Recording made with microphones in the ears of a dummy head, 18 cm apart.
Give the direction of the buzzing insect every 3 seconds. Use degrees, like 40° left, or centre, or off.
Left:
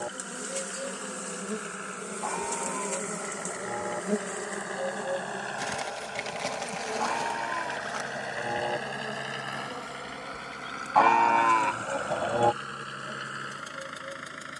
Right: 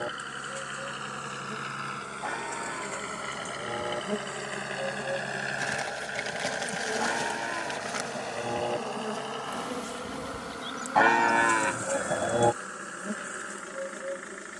50° left, 20° left, 20° right, 40° right, 50° right.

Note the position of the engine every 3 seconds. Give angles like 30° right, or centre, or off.
60° right, 40° right, centre, 30° left, 50° left.